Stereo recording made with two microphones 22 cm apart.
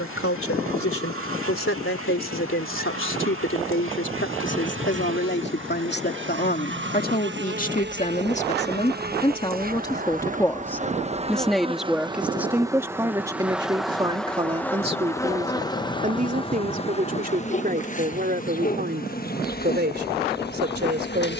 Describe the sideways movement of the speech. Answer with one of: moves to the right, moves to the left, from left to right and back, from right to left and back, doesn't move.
moves to the right.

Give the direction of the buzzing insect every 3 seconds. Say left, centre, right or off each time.
right, right, right, right, centre, left, left.